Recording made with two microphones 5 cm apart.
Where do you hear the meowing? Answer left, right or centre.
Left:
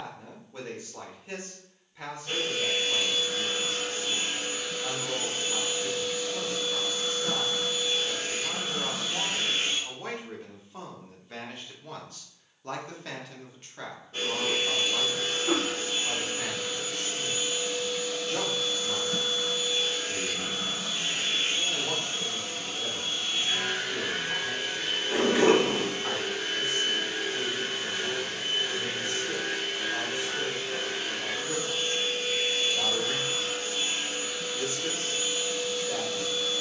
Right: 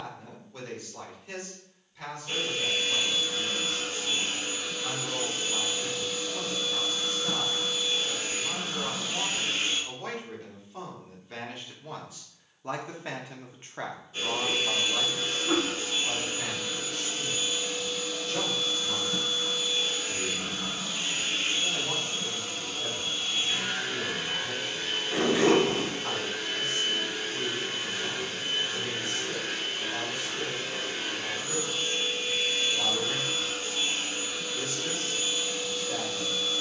left.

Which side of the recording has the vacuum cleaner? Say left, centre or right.
left.